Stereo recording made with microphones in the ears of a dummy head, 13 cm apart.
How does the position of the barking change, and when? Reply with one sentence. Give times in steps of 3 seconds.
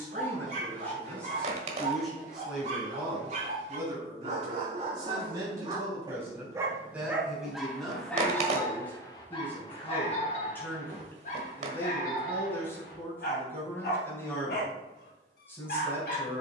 You can hear the barking on the right from 0 s, in the centre from 6 s and on the left from 9 s.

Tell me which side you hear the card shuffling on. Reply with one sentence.
You can hear the card shuffling on the right.